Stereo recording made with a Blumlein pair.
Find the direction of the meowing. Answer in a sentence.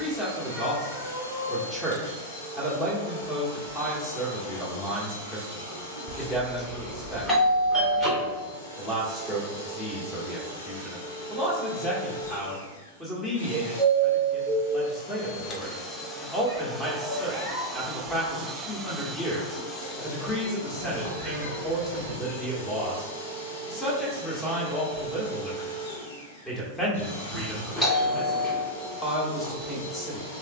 In this clip you hear the meowing on the left.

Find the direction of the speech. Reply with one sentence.
You can hear the speech in the centre.